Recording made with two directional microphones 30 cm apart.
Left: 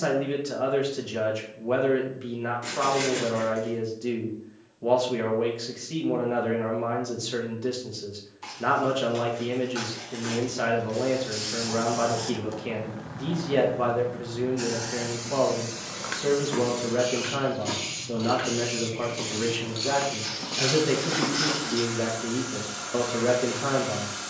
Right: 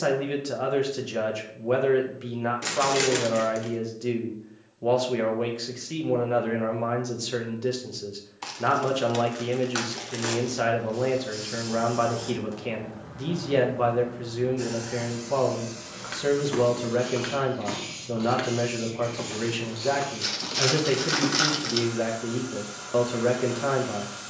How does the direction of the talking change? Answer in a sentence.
In this clip you hear the talking stay put.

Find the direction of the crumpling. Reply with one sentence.
You can hear the crumpling on the right.